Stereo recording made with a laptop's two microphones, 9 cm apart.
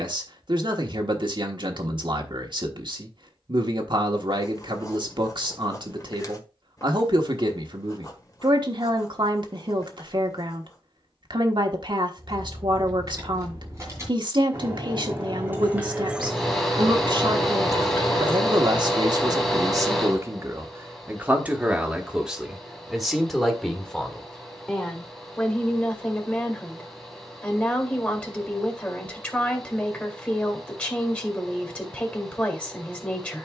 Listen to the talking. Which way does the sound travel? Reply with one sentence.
You can hear the talking move to the left.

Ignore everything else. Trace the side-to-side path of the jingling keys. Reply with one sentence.
You can hear the jingling keys travel towards the left.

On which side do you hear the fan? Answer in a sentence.
You can hear the fan in the centre.